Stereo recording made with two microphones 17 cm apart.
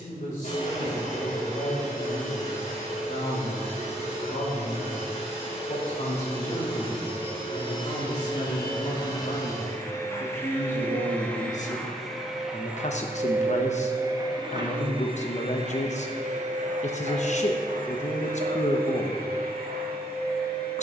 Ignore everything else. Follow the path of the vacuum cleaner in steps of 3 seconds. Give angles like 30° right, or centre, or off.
50° left, 40° left, 30° left, 10° left, 20° right, 50° right, 70° right.